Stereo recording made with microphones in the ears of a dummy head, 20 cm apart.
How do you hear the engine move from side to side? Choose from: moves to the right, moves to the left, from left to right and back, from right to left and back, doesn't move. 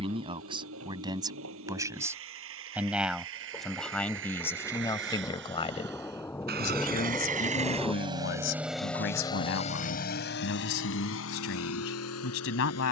moves to the left.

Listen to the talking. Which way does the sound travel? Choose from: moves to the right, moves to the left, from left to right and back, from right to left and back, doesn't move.
moves to the left.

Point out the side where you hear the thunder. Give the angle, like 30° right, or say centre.
10° left.